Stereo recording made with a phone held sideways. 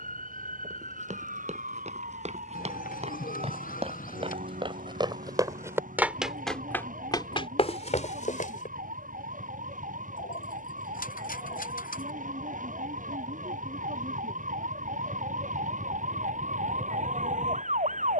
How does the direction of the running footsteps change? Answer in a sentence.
You can hear the running footsteps go from the right side to the left.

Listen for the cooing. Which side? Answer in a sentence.
In this clip you hear the cooing on the left.